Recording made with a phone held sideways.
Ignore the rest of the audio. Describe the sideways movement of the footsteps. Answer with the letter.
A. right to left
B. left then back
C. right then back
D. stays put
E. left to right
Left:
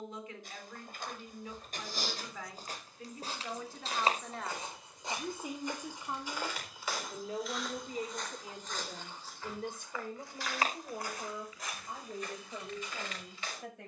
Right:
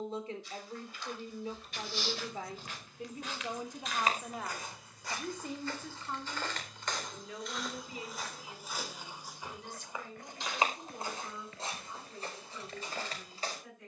E.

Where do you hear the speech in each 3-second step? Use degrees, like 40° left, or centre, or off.
30° right, 10° right, 40° left, 60° left, 70° left.